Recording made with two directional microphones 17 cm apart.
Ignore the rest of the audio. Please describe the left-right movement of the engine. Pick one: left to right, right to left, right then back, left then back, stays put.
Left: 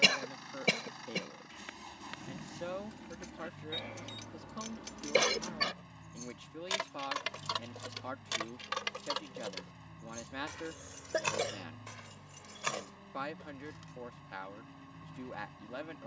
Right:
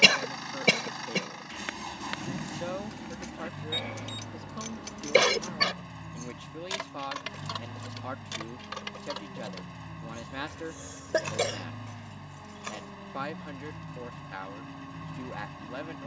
stays put.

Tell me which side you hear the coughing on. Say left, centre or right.
right.